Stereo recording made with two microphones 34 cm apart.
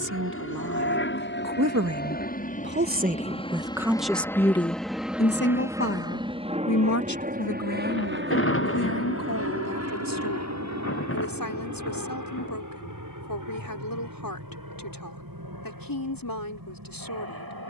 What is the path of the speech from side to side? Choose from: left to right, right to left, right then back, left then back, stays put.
right to left.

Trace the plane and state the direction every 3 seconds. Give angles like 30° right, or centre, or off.
30° left, centre, 20° right, 40° right, 60° right, 60° right.